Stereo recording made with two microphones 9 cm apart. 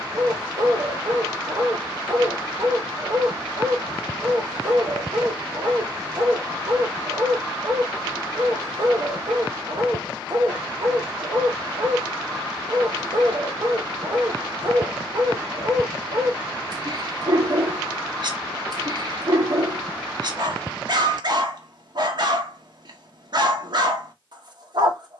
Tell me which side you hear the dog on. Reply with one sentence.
You can hear the dog on the right.